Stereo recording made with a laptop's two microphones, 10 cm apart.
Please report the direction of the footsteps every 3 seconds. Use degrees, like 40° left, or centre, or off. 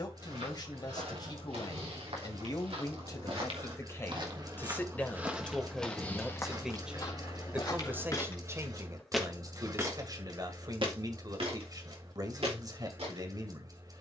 70° right, 30° right, 30° left, 40° right, 80° right.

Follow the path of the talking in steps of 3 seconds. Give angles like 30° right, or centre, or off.
40° left, 20° left, 20° right, 40° right, 40° right.